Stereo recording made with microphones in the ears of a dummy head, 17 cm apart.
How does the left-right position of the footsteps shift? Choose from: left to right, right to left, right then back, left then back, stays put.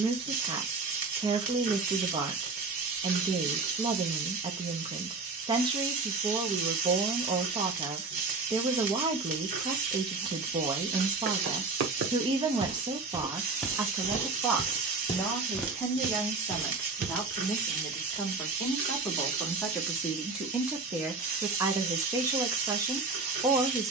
left then back.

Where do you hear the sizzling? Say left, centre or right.
right.